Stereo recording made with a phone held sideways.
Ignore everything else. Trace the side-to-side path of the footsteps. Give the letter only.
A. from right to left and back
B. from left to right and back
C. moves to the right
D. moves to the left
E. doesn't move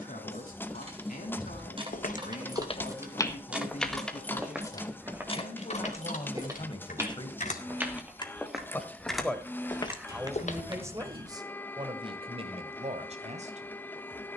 B.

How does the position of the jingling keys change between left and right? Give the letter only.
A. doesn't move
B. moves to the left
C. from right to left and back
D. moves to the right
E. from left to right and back
C.